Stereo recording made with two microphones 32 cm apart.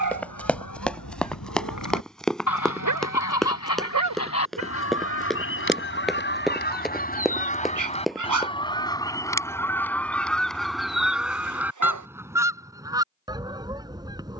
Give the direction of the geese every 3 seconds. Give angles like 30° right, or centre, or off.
70° left, 50° left, 20° left, centre, 10° right.